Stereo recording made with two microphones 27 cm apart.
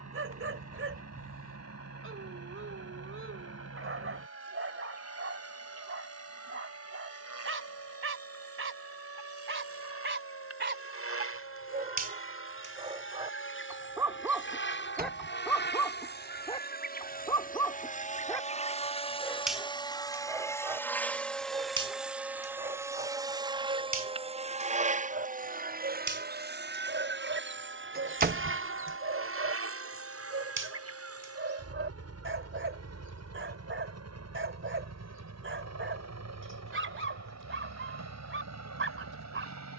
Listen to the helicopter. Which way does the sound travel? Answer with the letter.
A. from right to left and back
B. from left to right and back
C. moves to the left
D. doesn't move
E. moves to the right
E.